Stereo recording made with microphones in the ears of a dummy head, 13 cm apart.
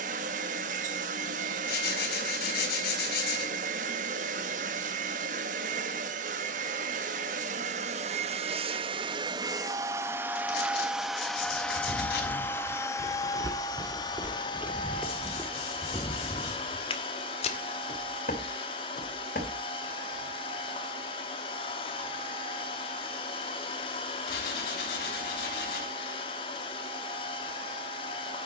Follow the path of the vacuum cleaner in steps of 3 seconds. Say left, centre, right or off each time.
right, right, right, centre, left, left, left, left, left, left.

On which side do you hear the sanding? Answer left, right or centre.
left.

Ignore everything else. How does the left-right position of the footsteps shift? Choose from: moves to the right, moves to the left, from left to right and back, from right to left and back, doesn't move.
moves to the left.